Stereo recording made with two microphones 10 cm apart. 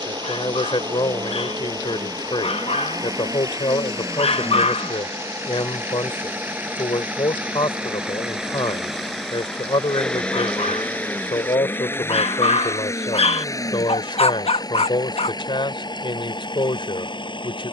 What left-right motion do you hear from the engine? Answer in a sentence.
You can hear the engine go from the right side to the left.